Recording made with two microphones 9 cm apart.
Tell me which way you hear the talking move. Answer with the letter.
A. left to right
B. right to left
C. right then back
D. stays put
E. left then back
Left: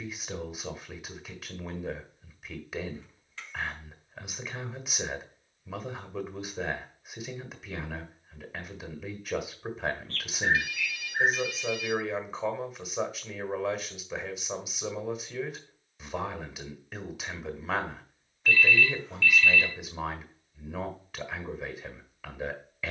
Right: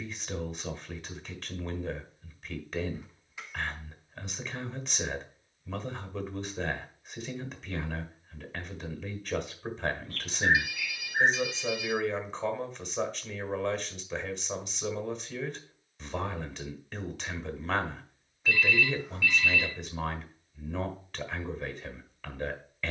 D.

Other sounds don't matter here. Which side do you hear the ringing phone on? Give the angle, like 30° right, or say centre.
10° right.